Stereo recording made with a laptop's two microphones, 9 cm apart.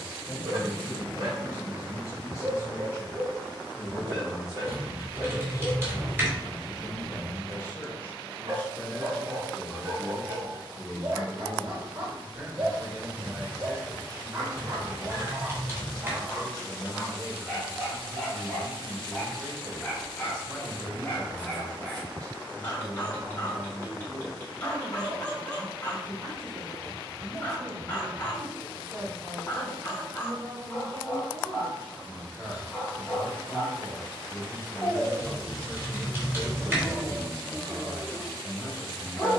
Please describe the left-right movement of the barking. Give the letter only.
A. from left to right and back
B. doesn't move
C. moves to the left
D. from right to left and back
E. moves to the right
C.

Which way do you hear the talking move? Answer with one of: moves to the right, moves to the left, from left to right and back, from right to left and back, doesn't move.
moves to the right.